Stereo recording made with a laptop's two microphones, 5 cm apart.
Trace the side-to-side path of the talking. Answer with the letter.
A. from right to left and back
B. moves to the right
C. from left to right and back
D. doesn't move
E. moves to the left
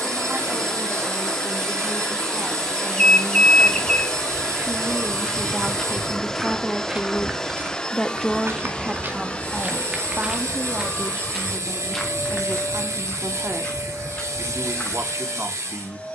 A.